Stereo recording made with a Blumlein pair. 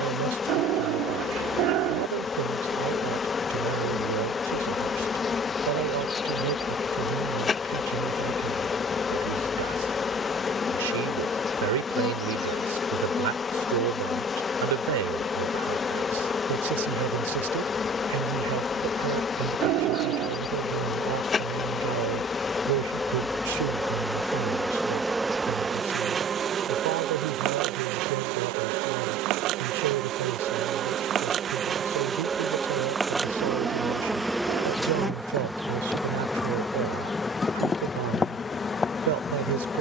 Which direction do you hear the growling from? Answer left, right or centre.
right.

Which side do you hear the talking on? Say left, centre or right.
right.